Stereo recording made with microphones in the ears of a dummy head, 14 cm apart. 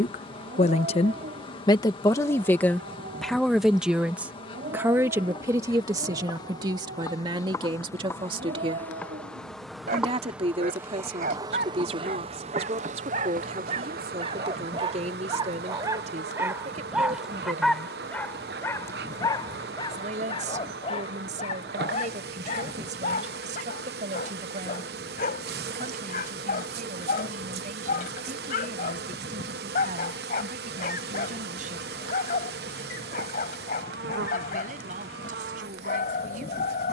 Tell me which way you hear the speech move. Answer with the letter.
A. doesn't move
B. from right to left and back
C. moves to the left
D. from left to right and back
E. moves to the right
E.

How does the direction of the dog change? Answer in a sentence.
In this clip you hear the dog go from the right side to the left.